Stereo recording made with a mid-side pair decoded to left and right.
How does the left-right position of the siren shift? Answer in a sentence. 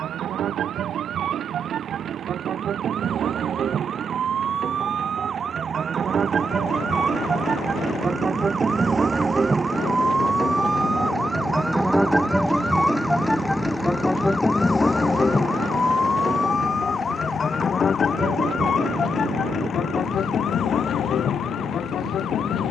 You can hear the siren move to the left.